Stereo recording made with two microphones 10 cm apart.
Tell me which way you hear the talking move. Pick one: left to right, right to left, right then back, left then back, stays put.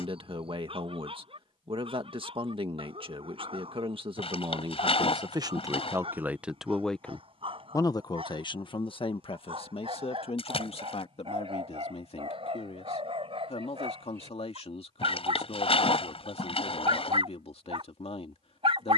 right to left.